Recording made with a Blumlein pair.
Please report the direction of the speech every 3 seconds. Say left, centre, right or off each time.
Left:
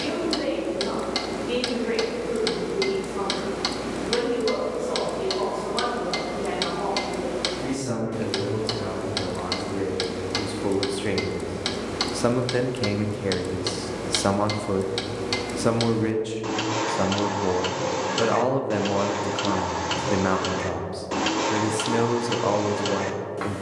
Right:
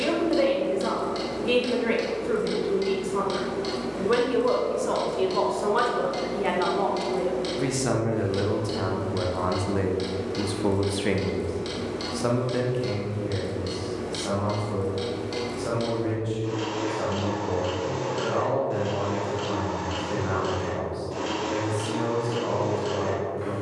right, right, right, centre, left, left, left, left.